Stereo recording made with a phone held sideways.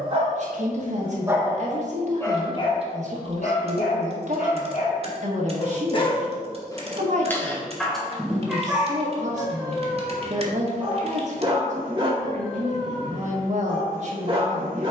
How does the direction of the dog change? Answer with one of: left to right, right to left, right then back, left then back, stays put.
left then back.